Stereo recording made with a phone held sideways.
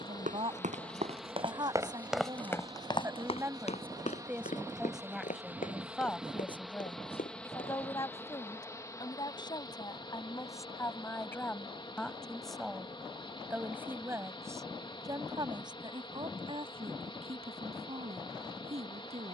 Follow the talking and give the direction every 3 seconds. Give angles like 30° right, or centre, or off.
30° right, 10° right, 20° left, 20° left, 10° right, 40° right, 50° right.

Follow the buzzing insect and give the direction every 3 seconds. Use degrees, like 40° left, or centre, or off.
10° right, 20° right, 10° left, 30° left, 30° left, 30° left, 30° left.